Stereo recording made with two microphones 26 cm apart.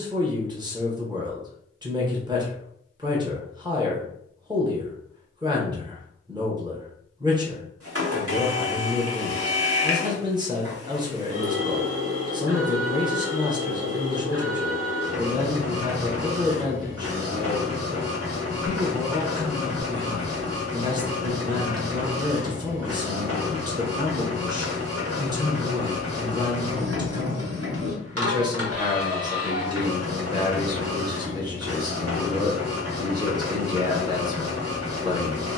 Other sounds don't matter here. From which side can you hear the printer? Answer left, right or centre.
right.